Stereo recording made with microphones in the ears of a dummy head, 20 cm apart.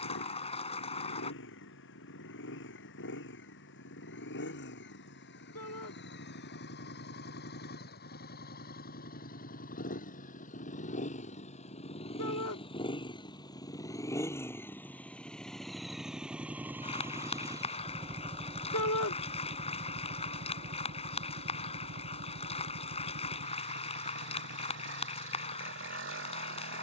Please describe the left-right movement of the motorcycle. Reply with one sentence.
You can hear the motorcycle travel towards the right.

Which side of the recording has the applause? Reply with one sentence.
In this clip you hear the applause on the left.